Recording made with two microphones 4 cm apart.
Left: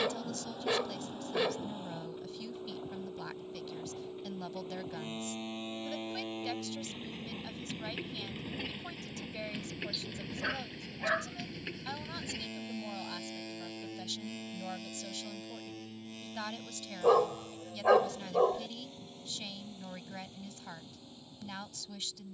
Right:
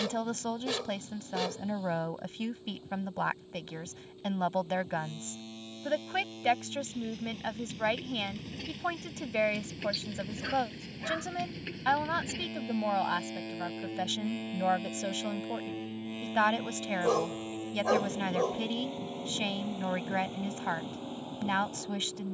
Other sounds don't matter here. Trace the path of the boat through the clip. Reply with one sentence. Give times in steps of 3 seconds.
In this clip you hear the boat on the left from 0 s, in the centre from 9 s and on the right from 15 s.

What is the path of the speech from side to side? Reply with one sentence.
In this clip you hear the speech stay put.